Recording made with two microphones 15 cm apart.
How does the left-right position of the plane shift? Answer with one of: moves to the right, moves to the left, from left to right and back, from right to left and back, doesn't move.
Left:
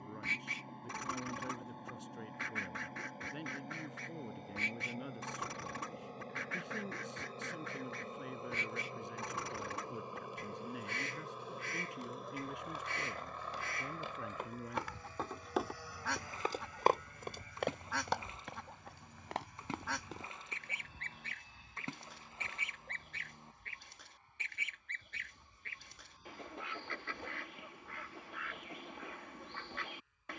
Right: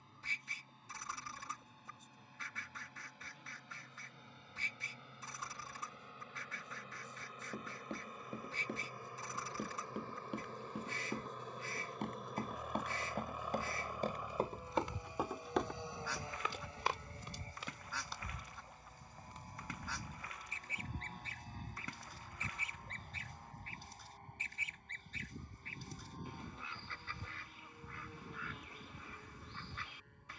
moves to the right.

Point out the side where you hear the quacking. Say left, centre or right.
left.